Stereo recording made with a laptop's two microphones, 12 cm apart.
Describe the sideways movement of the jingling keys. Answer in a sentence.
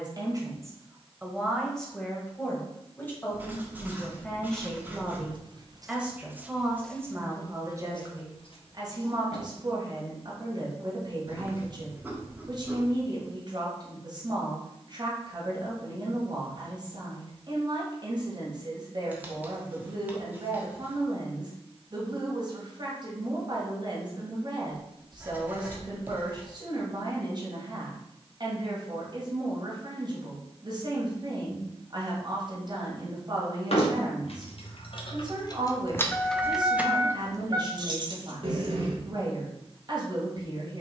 In this clip you hear the jingling keys travel towards the right.